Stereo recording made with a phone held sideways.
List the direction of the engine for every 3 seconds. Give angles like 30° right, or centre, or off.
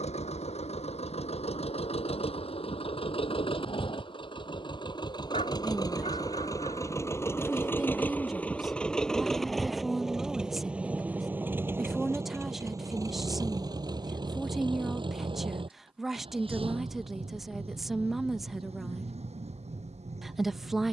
50° left, 40° left, 20° left, 10° right, 30° right, 40° right, 50° right.